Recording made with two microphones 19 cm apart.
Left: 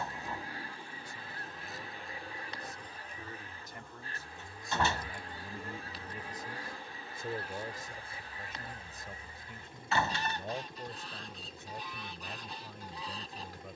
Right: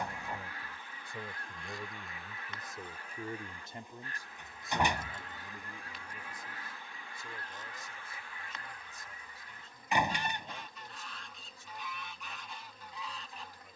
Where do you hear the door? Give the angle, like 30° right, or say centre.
20° right.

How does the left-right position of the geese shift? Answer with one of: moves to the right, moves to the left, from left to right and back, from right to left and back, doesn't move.
doesn't move.